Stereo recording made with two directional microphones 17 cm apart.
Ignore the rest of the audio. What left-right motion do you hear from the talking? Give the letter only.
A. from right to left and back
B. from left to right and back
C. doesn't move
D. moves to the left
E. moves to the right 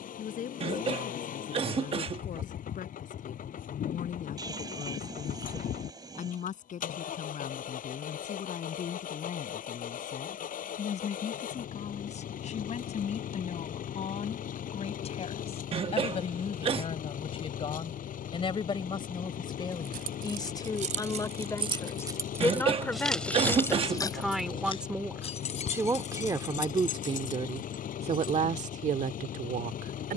E.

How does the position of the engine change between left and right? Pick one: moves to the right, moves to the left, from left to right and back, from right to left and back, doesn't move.
doesn't move.